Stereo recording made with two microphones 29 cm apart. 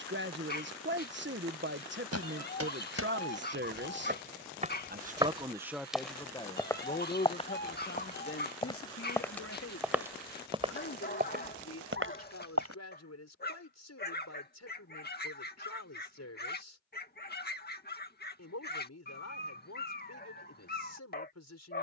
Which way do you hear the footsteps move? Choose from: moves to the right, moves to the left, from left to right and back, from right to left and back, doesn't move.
from right to left and back.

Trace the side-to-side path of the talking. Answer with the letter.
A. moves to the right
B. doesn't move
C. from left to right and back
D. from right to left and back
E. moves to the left
E.